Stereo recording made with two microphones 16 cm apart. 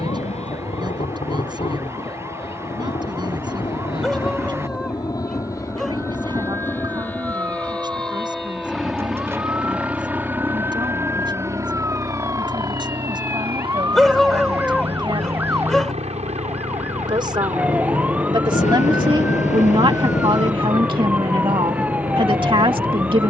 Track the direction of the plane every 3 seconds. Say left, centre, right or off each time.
left, left, centre, centre, right, right, right, right.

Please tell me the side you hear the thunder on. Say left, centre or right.
left.